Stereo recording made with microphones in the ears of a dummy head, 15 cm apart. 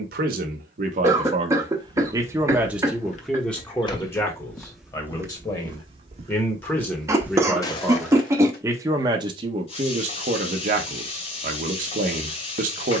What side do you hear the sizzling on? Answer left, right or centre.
left.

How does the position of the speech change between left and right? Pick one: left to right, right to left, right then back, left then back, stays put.
left then back.